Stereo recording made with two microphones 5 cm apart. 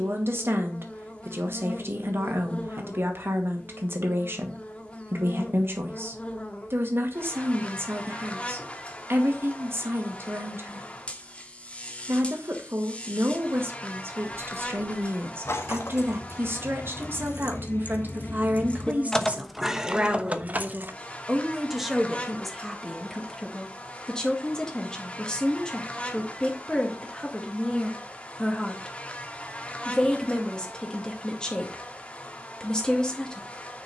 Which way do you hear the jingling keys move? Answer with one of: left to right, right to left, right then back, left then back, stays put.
left to right.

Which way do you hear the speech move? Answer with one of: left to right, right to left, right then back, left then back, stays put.
right to left.